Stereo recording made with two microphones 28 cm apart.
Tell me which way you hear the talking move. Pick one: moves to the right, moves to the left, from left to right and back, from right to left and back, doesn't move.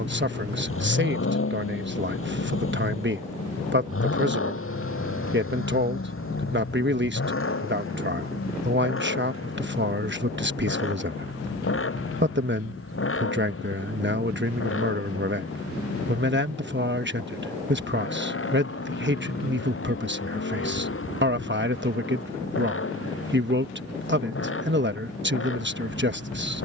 doesn't move.